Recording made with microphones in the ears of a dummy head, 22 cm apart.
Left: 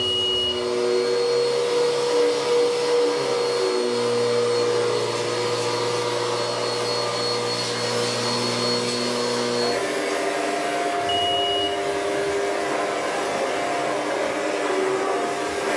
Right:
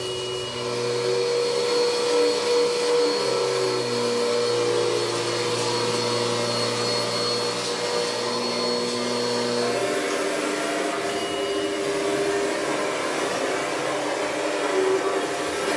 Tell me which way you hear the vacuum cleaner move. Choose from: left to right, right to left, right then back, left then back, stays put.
left then back.